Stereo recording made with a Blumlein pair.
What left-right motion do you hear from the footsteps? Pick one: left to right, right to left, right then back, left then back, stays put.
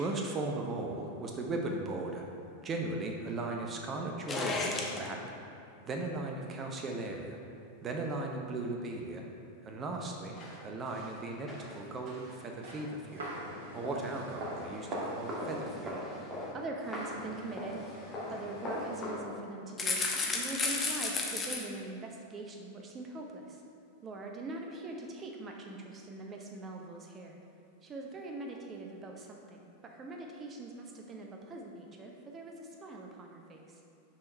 right then back.